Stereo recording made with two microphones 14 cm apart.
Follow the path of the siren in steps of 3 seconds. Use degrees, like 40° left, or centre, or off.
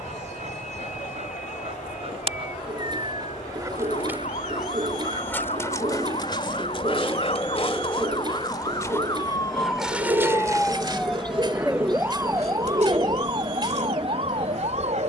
70° left, 60° left, 50° left, 10° left, 40° right.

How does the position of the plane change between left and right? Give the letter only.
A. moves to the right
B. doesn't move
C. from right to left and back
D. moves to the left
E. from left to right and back
A.